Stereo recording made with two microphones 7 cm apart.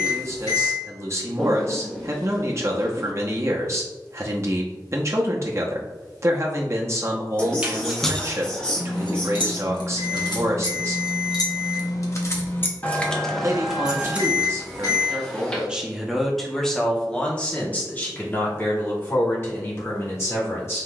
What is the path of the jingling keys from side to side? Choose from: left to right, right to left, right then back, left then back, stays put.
left then back.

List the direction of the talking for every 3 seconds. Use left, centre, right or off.
right, right, right, right, right, centre, left.